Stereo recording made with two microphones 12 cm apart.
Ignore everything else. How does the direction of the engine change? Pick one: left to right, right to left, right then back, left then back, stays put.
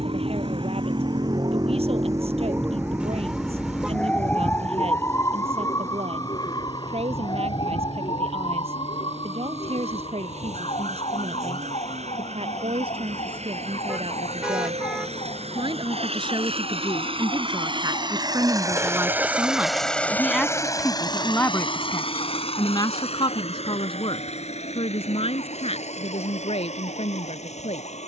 right to left.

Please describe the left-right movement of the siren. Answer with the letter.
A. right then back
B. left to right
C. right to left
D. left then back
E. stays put
C.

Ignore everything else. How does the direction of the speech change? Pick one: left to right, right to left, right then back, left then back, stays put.
right to left.